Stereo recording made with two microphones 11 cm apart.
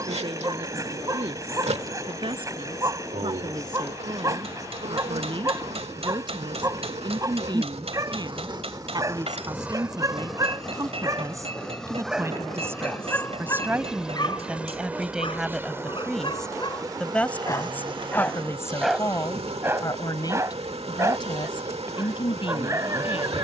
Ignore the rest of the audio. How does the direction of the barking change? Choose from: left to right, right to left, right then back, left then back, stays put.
left then back.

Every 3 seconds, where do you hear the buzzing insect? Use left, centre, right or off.
right, right, right, centre, centre, right, right, right.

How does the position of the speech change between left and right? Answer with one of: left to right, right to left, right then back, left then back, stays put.
right to left.